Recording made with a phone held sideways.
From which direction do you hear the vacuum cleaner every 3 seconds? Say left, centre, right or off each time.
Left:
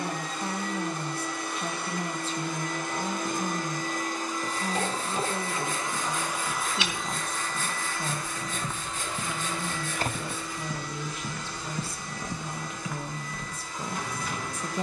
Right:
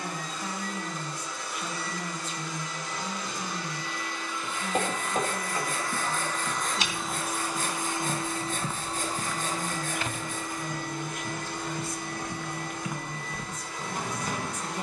left, left, centre, right, right.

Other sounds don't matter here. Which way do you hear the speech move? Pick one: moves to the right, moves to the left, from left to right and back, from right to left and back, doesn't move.
doesn't move.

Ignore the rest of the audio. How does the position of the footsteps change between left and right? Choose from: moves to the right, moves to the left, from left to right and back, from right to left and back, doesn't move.
from right to left and back.